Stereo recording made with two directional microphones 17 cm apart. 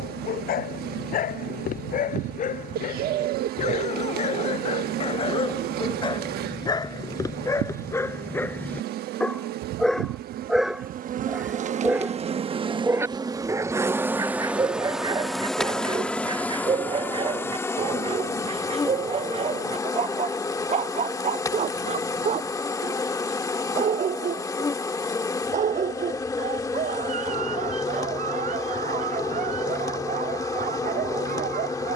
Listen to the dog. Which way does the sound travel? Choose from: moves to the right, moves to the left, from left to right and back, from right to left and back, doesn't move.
moves to the right.